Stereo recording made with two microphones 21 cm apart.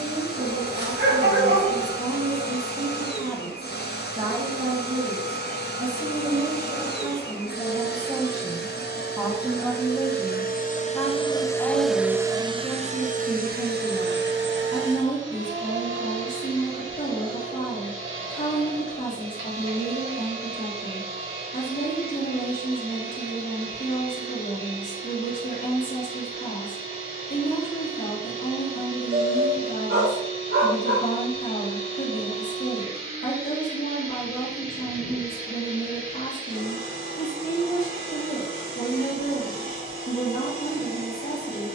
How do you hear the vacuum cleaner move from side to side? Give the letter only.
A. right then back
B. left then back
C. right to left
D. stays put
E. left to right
E.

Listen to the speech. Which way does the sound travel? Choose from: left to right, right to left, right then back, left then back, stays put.
right to left.